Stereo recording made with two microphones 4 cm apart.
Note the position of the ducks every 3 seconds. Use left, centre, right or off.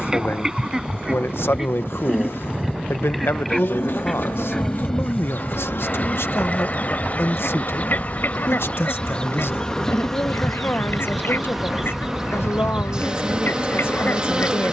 centre, centre, left, left, left.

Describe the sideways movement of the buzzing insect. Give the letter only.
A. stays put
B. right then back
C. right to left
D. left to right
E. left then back
D.